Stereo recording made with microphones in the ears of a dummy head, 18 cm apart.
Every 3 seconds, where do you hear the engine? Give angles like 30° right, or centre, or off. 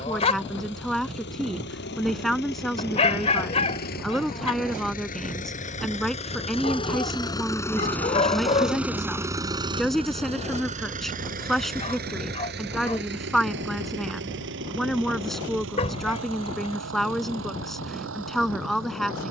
60° left, 50° left, 20° left, 30° right, 60° right, 70° right, 80° right.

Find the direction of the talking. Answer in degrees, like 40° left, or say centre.
centre.